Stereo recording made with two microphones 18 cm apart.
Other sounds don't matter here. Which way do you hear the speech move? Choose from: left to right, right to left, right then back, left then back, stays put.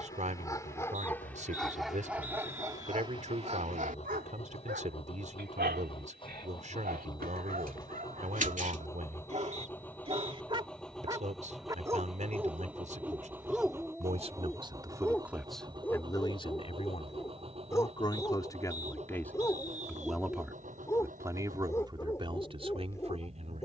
left then back.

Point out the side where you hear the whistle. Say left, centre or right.
right.